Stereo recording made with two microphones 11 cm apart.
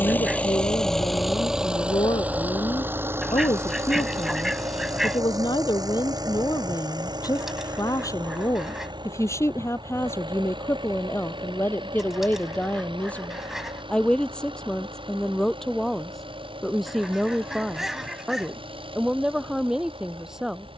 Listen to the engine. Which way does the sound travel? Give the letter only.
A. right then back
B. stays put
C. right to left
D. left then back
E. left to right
E.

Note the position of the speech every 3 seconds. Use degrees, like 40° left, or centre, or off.
50° left, 50° left, 30° left, 20° left, 10° left, centre, 10° right.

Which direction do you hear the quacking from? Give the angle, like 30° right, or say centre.
centre.